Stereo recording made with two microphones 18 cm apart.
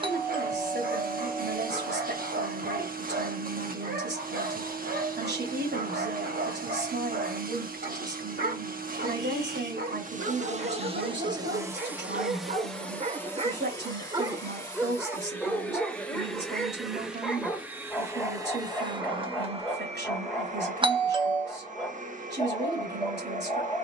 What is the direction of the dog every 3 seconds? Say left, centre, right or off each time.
right, right, right, right, right, centre, centre, centre.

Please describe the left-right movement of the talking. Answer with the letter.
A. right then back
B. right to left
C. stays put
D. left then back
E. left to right
C.